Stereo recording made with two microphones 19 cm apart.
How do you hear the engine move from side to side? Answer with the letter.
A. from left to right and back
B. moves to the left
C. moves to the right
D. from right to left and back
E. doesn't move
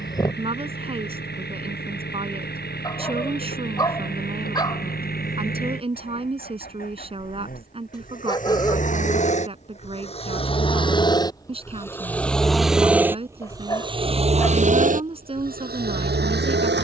C.